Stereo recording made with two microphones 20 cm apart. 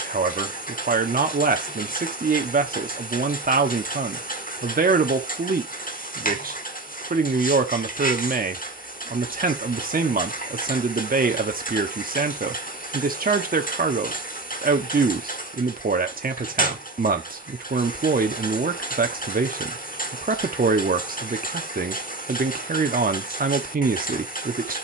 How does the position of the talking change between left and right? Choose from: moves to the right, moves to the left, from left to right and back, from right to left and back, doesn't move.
doesn't move.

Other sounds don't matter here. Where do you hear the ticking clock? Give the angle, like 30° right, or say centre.
50° left.